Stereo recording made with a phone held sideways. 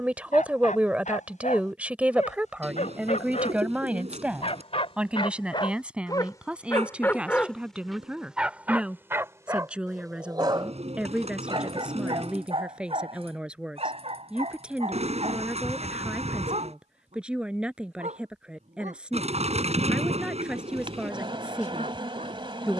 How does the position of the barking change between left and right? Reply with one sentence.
In this clip you hear the barking travel towards the right.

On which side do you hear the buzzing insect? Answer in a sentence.
In this clip you hear the buzzing insect on the right.